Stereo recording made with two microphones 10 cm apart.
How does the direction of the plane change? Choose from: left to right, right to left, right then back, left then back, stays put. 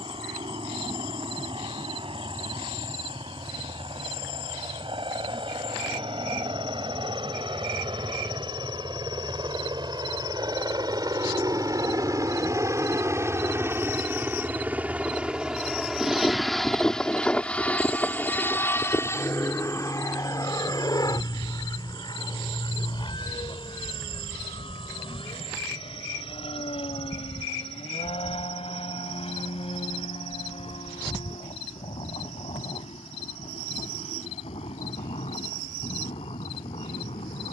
right to left.